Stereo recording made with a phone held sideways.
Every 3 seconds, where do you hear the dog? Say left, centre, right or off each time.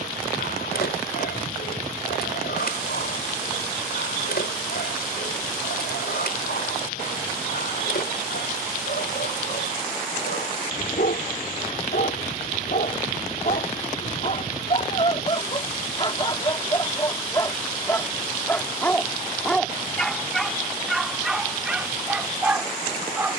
left, left, left, left, left, left, centre, centre.